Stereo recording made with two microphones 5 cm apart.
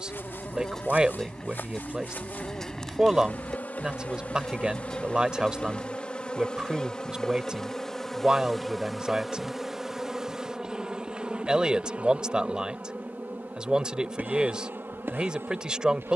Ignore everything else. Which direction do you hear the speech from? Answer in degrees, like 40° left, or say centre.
20° right.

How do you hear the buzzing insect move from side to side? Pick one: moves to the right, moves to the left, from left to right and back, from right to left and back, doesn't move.
moves to the right.